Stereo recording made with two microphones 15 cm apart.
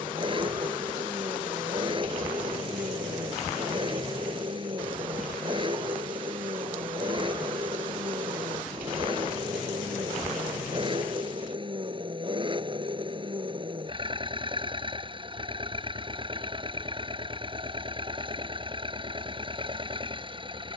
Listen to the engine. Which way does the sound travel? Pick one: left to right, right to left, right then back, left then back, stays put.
stays put.